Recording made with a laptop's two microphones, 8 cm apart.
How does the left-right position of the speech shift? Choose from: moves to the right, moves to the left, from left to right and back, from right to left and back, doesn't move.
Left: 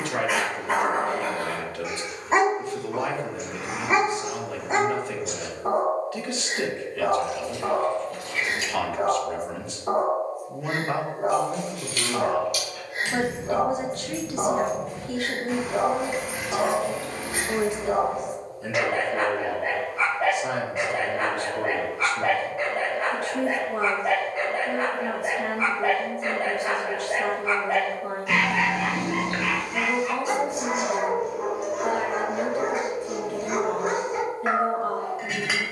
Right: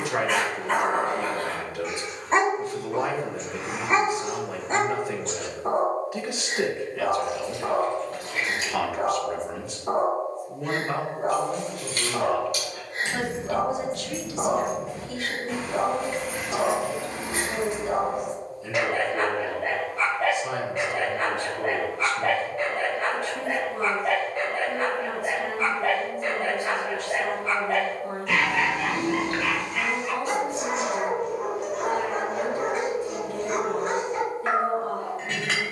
moves to the left.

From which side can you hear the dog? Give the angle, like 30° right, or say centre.
10° left.